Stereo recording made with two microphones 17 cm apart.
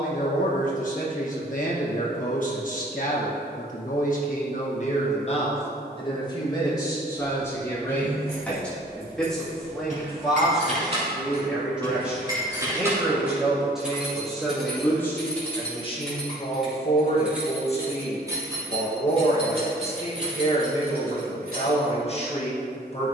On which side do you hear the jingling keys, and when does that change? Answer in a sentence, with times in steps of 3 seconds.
In this clip you hear the jingling keys not at all from 0 s, on the right from 6 s, in the centre from 12 s and on the right from 18 s.